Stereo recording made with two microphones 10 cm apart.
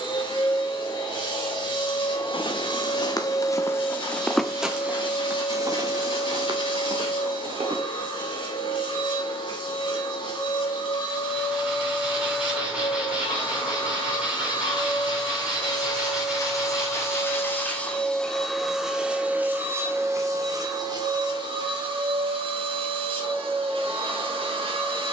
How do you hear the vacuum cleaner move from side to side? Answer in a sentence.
You can hear the vacuum cleaner travel towards the right.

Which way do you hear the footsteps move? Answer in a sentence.
In this clip you hear the footsteps move to the right.